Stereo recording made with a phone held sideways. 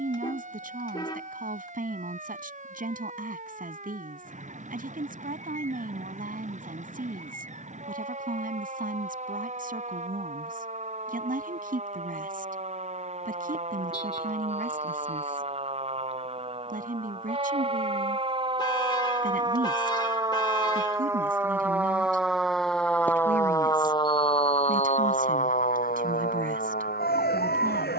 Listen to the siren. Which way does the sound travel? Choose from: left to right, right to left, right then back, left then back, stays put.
right to left.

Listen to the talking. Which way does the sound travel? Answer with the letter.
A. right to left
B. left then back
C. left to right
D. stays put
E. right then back
D.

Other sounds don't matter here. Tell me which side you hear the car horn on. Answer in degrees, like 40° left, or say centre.
30° left.